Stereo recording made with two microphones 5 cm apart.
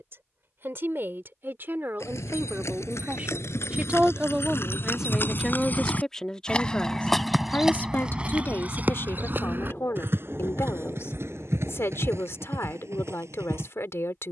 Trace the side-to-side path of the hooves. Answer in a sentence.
In this clip you hear the hooves move from left to right.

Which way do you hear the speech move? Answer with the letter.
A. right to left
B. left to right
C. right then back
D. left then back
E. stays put
A.